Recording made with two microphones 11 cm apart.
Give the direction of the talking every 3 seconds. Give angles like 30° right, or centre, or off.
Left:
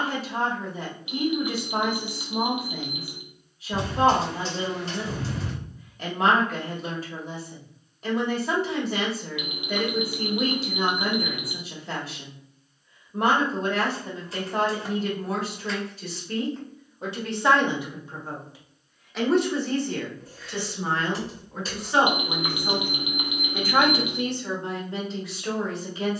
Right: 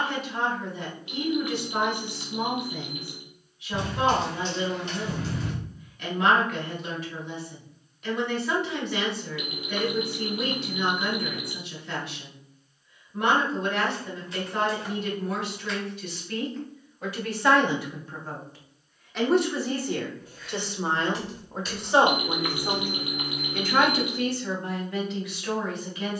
30° left, 30° left, 30° left, 30° left, 30° left, 30° left, centre, 10° right, 30° left.